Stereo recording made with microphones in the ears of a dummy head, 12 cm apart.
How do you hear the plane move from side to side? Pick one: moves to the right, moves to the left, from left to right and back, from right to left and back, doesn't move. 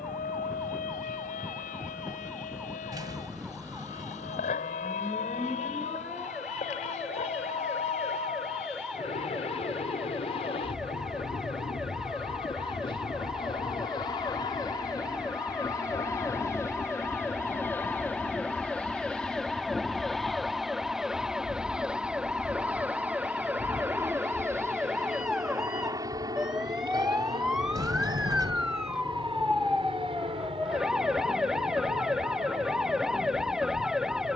moves to the right.